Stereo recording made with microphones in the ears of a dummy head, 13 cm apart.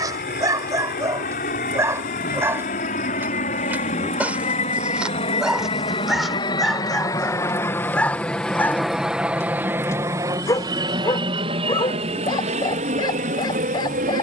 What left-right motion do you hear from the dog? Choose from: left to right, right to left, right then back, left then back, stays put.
right to left.